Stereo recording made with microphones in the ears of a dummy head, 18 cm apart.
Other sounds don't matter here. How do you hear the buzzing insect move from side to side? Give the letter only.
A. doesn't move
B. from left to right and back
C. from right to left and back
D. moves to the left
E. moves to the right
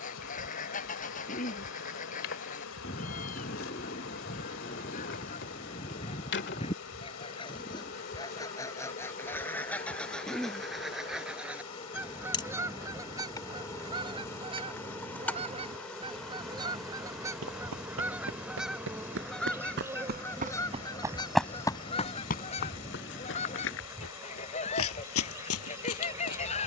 E.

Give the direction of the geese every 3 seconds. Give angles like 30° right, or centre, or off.
40° left, 40° left, 20° left, centre, 20° right, 20° right, centre, 30° left, 30° left.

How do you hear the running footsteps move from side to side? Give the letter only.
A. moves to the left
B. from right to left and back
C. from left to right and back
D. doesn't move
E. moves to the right
A.